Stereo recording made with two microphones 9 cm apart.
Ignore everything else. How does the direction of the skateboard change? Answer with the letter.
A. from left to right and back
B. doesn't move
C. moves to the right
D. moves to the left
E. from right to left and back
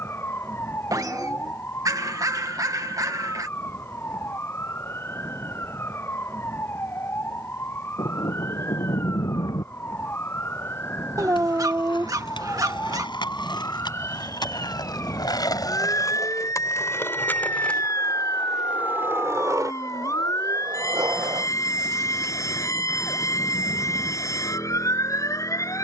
C.